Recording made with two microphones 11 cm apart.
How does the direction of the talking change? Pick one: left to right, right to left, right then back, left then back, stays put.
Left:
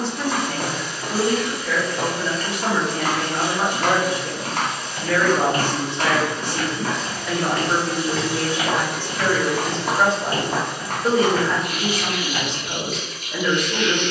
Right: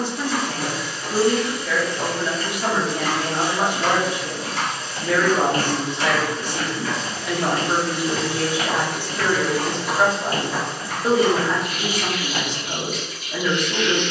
stays put.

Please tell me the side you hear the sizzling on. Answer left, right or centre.
left.